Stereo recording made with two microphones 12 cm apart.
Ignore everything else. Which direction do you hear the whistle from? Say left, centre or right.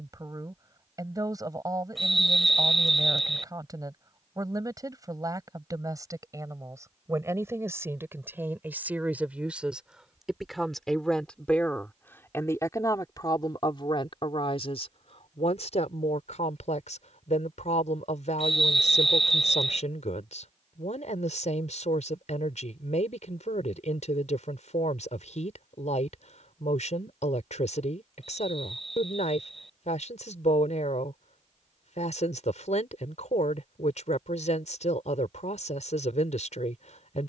centre.